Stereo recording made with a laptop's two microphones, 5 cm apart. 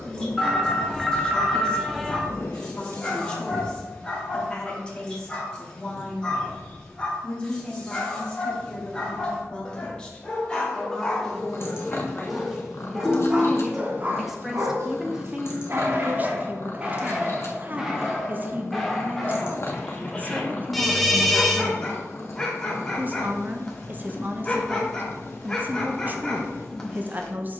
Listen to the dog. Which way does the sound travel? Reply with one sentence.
You can hear the dog go right and come back.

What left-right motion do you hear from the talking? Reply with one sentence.
You can hear the talking move to the right.